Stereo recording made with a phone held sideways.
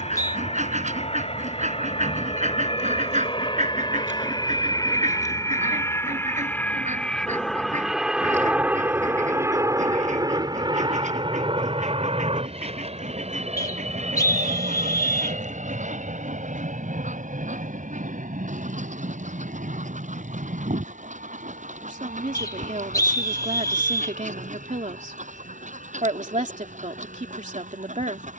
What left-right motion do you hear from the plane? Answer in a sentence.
In this clip you hear the plane go from the left side to the right.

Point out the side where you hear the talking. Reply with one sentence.
You can hear the talking on the right.